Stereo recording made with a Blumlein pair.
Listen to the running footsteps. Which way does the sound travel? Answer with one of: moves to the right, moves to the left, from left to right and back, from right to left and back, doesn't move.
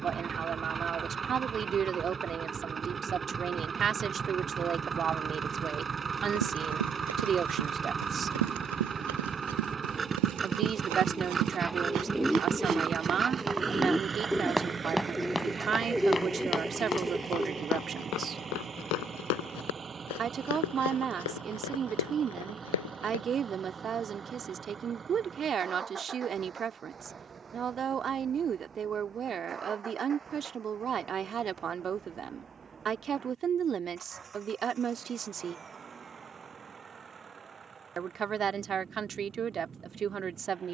moves to the left.